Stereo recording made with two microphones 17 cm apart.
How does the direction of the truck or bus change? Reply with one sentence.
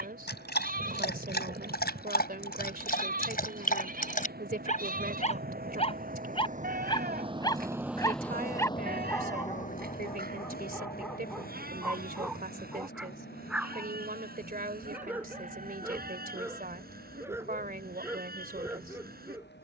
You can hear the truck or bus go from the right side to the left.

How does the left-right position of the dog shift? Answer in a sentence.
In this clip you hear the dog go from the left side to the right.